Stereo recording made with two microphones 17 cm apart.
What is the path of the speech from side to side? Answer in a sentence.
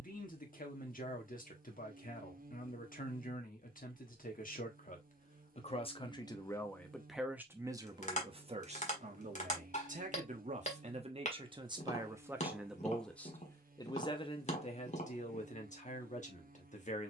You can hear the speech go right and come back.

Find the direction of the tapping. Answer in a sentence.
You can hear the tapping on the left.